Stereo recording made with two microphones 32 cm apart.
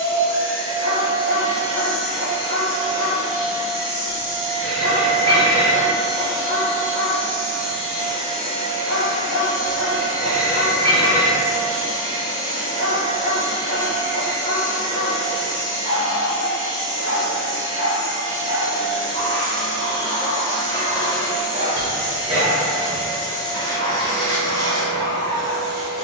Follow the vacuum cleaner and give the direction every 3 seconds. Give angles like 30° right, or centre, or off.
10° left, 40° right, 10° right, 10° left, 10° left, 10° left, 10° left, 10° left, 10° left.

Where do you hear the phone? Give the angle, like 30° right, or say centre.
30° left.